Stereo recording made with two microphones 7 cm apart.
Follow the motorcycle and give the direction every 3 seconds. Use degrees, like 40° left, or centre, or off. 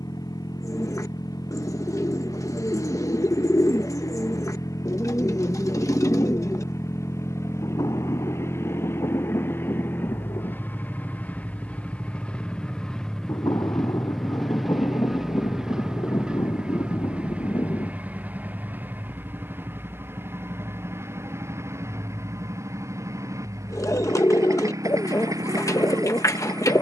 60° left, 50° left, 40° left, 30° left, 10° left, 10° right, 30° right, 40° right, 50° right.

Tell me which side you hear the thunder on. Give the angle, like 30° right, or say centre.
60° left.